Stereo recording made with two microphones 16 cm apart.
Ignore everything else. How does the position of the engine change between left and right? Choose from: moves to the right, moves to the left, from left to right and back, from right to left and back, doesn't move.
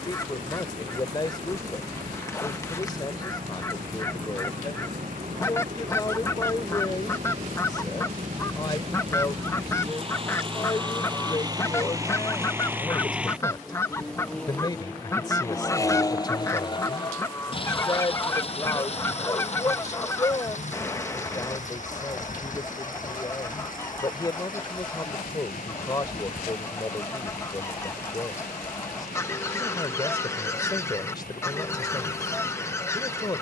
moves to the left.